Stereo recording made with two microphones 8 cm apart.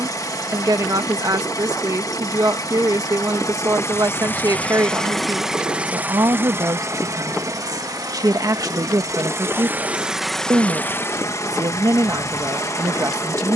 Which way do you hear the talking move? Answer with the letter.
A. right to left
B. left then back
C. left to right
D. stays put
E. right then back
D.